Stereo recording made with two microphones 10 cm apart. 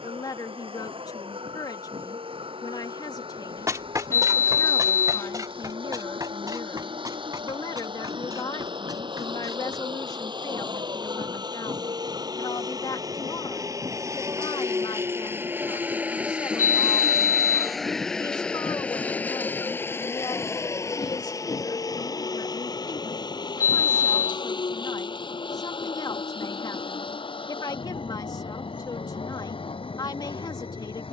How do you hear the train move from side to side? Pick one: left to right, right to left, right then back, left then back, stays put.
right to left.